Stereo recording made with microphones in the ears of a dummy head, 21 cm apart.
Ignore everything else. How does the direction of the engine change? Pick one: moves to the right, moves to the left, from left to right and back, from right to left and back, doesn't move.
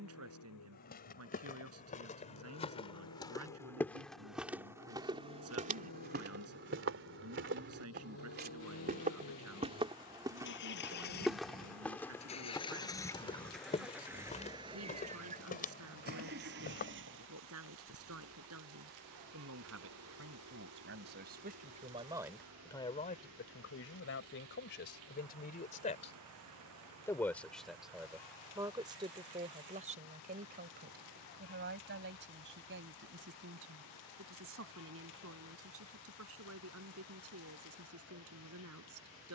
moves to the right.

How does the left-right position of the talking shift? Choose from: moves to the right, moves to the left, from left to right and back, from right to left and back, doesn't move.
from right to left and back.